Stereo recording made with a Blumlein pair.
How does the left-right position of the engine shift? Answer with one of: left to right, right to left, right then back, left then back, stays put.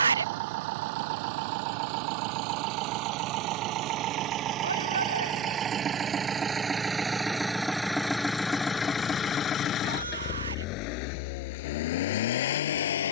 right to left.